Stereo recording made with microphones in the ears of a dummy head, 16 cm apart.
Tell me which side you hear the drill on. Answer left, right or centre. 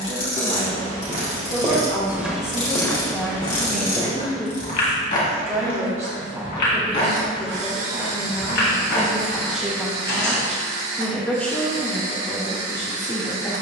right.